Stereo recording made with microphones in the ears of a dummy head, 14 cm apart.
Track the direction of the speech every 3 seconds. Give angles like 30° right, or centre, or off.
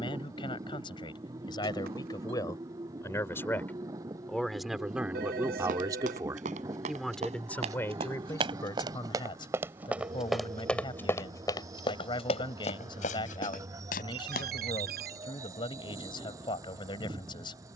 30° left, centre, 10° left, 30° left, 30° left, 30° left.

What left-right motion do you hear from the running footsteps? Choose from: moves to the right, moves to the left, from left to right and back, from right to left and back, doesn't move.
moves to the left.